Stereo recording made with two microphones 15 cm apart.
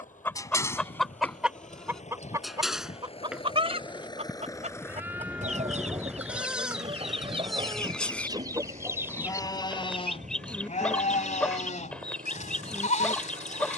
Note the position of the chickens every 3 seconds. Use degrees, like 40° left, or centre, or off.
centre, 50° right, 40° right, centre, 10° left.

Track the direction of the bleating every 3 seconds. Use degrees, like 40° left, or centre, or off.
10° left, 10° right, centre, 40° left, 60° left.